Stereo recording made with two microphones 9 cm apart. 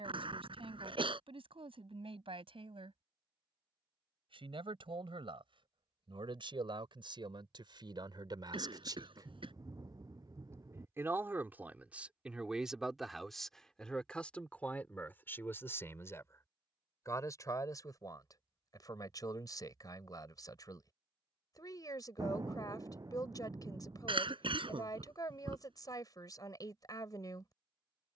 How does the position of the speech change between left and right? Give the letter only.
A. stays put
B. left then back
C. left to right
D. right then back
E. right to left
E.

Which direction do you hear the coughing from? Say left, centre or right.
right.